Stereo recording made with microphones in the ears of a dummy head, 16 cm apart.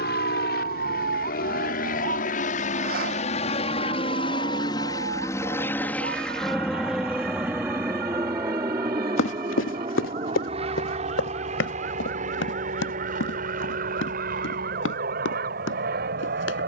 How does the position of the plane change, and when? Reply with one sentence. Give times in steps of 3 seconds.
In this clip you hear the plane on the left from 0 s, in the centre from 6 s and on the right from 9 s.